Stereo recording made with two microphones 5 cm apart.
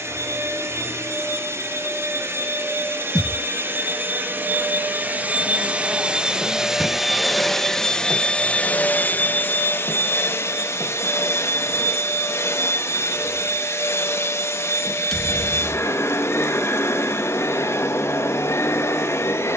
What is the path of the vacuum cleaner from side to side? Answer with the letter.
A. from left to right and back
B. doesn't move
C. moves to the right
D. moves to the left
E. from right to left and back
D.